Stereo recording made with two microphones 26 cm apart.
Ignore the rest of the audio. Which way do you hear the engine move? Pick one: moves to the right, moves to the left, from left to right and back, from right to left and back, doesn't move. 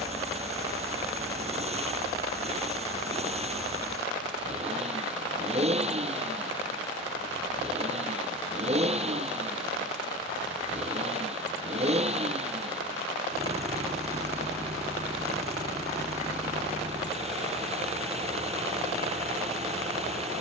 doesn't move.